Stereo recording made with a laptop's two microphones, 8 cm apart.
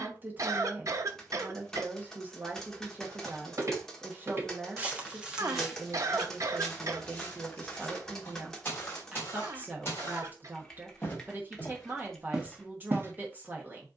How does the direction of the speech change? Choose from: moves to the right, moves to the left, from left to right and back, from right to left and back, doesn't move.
doesn't move.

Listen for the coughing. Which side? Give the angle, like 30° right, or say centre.
50° right.